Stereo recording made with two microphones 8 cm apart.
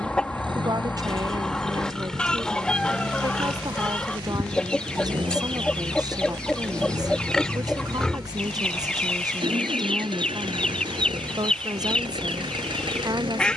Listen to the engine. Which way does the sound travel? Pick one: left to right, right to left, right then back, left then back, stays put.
stays put.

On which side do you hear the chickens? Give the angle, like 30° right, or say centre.
10° left.